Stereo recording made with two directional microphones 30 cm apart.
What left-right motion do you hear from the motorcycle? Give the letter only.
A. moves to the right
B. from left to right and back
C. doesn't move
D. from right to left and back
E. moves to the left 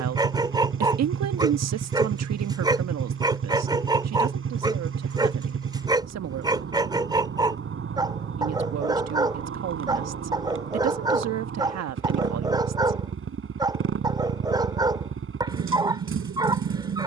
C.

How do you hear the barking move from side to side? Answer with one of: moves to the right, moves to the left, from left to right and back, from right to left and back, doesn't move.
doesn't move.